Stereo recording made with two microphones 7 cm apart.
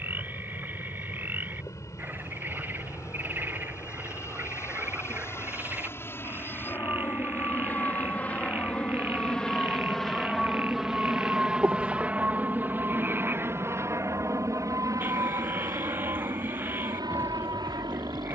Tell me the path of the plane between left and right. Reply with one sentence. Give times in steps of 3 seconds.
You can hear the plane on the left from 0 s, in the centre from 9 s and on the right from 12 s.